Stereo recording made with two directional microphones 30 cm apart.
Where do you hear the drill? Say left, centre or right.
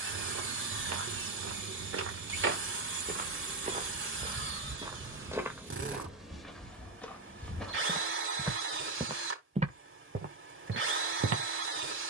right.